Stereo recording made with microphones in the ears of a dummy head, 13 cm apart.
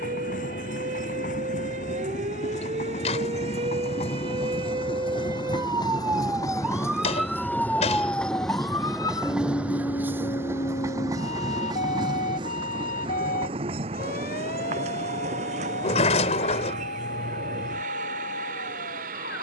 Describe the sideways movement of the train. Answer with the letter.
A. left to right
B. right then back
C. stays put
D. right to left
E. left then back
A.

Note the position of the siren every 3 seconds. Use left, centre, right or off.
right, right, centre, left, left, left, left.